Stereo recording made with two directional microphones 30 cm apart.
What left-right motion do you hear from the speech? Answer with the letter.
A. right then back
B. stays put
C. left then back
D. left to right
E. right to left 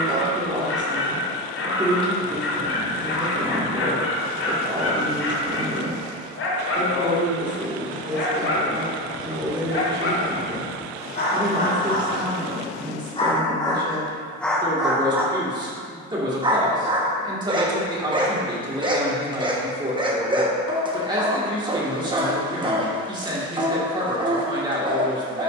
B.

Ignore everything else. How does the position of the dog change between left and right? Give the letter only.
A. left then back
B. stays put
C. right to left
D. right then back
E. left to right
E.